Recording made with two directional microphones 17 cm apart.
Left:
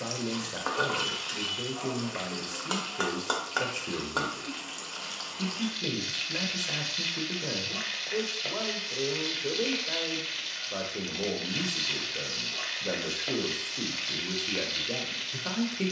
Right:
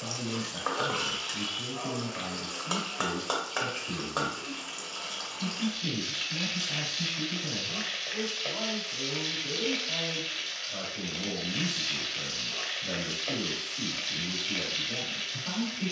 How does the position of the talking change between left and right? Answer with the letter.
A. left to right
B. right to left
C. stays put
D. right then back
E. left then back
C.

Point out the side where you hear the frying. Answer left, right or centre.
centre.